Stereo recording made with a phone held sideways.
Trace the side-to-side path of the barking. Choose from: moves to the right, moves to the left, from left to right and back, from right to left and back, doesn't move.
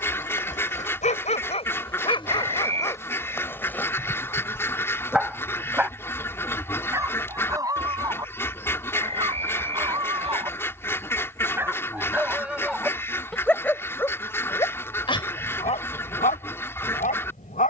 from left to right and back.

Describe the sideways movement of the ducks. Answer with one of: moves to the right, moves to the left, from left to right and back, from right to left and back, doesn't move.
doesn't move.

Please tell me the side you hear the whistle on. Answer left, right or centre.
right.